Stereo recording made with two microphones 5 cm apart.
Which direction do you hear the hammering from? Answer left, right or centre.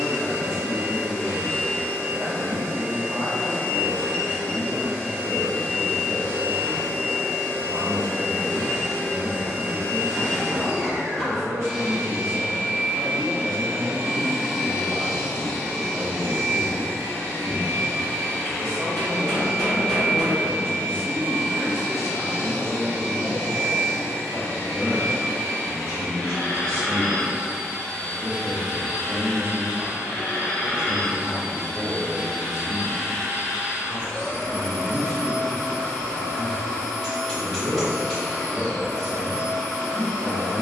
centre.